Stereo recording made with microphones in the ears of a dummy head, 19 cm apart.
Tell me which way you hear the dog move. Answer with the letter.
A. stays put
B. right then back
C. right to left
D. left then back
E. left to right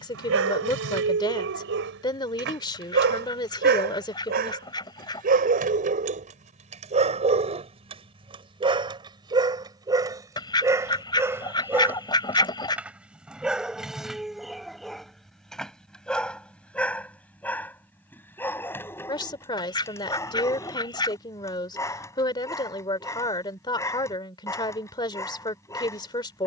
C.